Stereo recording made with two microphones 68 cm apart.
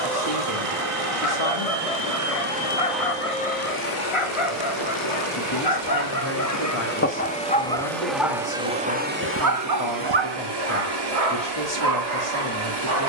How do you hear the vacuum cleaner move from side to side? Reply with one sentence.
In this clip you hear the vacuum cleaner go left and come back.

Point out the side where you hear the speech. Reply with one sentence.
You can hear the speech on the left.